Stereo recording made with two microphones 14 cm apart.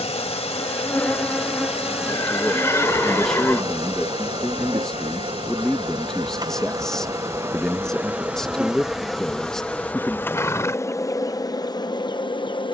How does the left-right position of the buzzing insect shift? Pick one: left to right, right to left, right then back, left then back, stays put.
right then back.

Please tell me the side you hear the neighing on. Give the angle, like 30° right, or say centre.
20° left.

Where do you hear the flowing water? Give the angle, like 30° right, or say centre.
50° left.